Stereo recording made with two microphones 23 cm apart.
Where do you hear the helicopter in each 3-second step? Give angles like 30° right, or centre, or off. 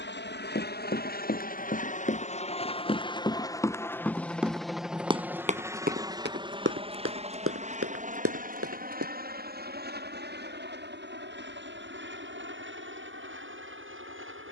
40° left, centre, 30° right, 40° right, 50° right.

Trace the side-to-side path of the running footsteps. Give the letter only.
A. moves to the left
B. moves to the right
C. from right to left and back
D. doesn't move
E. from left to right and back
B.